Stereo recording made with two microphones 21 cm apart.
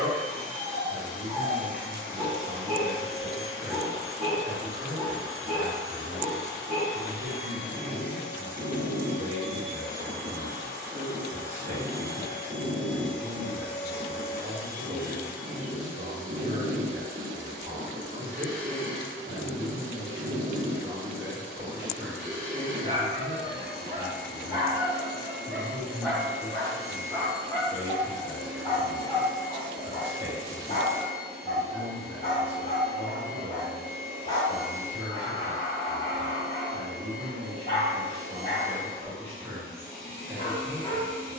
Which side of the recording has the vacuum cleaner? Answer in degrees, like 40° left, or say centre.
80° left.